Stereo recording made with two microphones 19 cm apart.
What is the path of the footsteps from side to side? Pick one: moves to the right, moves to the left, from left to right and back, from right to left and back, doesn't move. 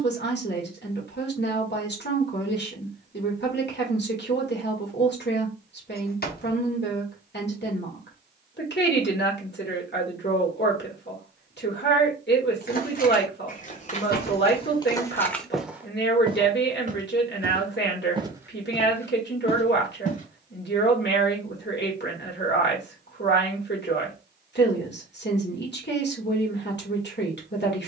from left to right and back.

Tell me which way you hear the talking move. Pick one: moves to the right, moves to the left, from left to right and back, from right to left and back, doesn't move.
doesn't move.